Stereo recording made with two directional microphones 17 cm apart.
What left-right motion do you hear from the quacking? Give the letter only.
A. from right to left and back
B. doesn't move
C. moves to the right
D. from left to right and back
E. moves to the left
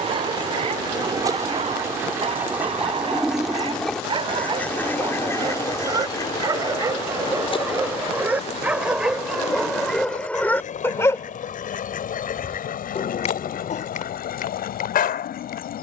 E.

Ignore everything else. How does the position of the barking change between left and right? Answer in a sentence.
In this clip you hear the barking move to the left.